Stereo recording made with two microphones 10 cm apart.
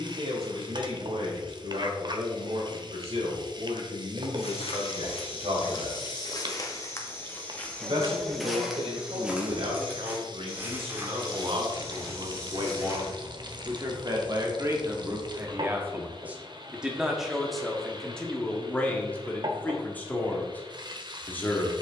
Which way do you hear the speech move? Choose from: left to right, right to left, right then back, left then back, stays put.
right to left.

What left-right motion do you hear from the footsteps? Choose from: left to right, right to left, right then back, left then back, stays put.
left to right.